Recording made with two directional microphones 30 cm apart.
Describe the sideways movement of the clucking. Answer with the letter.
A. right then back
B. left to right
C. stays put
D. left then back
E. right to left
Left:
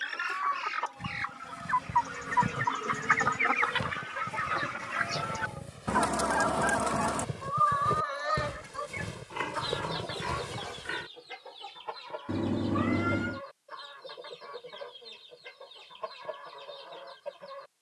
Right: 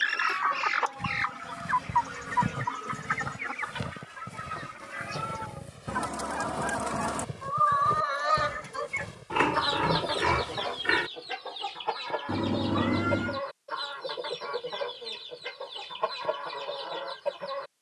D.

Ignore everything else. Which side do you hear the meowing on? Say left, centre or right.
centre.